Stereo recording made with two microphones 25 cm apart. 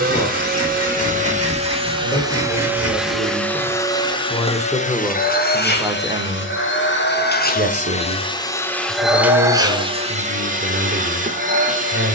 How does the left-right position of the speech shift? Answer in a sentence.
In this clip you hear the speech go from the left side to the right.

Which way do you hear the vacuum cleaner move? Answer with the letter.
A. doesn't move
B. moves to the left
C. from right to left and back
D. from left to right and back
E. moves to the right
C.